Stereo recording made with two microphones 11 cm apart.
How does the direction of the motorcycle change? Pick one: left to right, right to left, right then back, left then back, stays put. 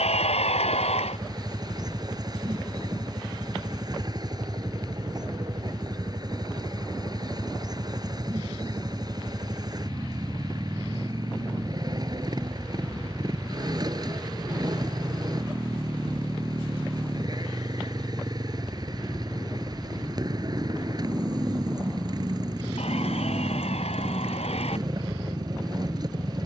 stays put.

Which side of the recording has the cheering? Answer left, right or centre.
left.